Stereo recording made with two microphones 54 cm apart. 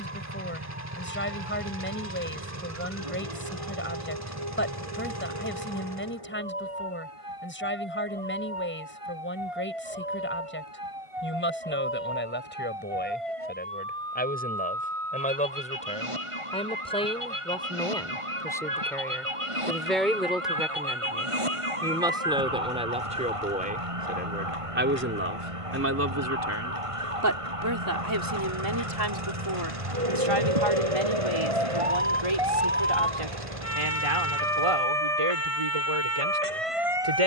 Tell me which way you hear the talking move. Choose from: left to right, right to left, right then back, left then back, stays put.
left to right.